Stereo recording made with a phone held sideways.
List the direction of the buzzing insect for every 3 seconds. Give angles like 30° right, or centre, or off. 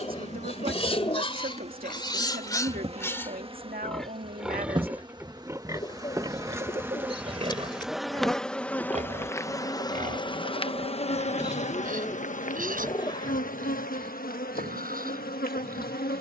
40° right, 30° right, 10° right, 30° left, 70° left, 80° left.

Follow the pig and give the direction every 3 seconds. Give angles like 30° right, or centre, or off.
30° left, 10° right, 40° right, 60° right, 70° right, 70° right.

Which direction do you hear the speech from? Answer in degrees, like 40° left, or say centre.
70° right.